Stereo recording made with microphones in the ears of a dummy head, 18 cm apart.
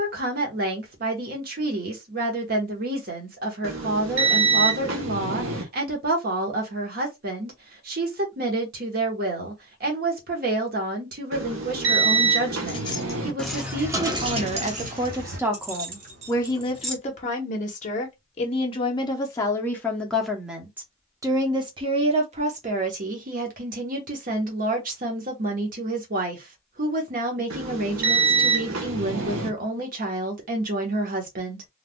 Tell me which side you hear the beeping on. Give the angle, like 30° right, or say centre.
70° right.